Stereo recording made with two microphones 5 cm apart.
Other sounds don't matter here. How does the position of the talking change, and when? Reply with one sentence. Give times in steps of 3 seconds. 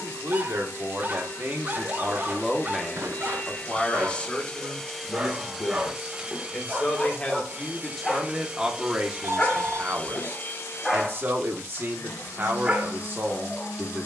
In this clip you hear the talking on the right from 0 s, on the left from 3 s, in the centre from 6 s and on the right from 9 s.